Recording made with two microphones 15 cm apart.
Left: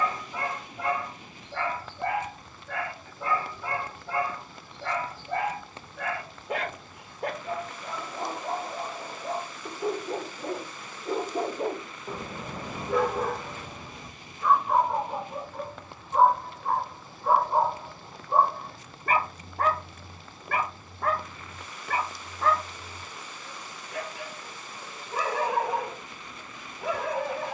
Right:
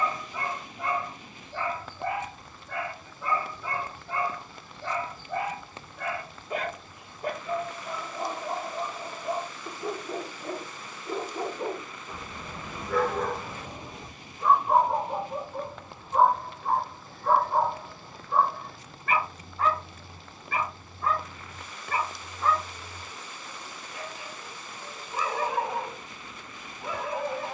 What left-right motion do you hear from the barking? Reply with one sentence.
In this clip you hear the barking go right and come back.